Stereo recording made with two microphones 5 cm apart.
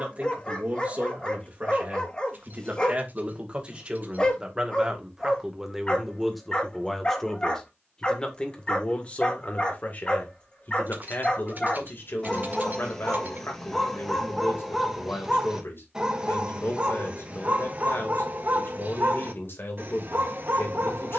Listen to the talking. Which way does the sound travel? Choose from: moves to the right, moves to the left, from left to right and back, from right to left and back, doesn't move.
moves to the left.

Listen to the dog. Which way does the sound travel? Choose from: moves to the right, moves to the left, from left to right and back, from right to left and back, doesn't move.
moves to the right.